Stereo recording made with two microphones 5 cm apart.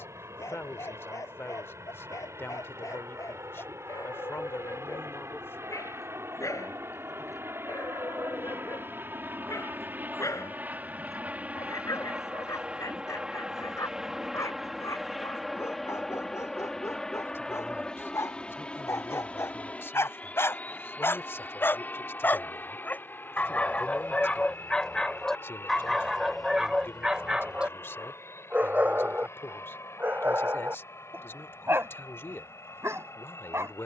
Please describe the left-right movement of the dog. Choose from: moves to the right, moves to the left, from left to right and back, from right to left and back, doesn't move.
moves to the right.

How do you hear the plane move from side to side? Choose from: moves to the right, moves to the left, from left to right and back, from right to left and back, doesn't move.
moves to the left.